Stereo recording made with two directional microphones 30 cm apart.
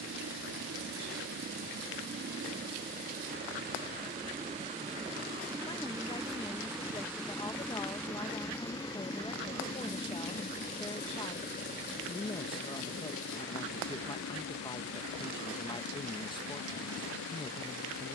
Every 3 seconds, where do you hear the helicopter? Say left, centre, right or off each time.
right, right, centre, left, left, left.